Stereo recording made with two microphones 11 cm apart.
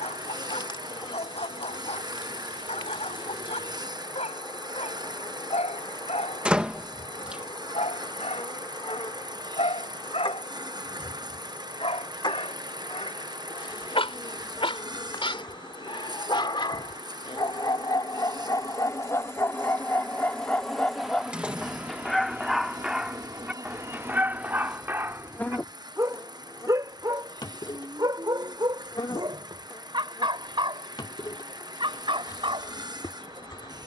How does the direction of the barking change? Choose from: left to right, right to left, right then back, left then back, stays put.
left to right.